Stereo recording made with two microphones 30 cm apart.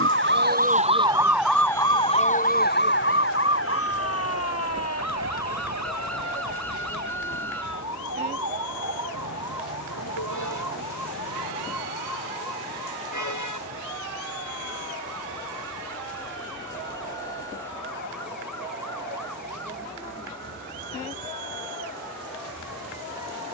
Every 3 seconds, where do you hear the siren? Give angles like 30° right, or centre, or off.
centre, 50° left, 60° left, 70° left, 70° left, 70° left, 70° left, 80° left.